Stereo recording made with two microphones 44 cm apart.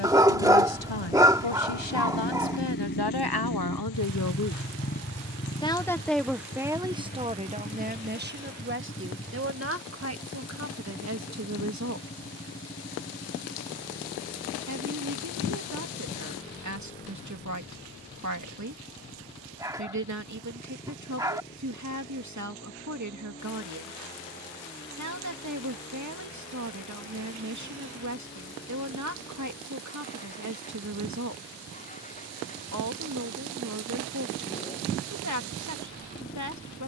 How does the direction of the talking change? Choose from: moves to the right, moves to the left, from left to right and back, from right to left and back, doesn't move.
moves to the right.